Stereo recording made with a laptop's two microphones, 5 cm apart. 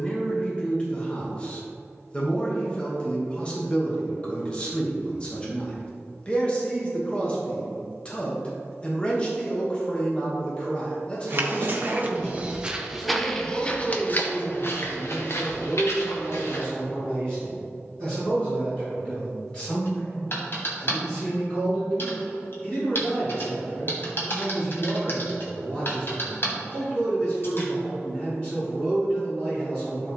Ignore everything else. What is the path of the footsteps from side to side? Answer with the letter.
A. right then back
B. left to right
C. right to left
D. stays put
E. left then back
C.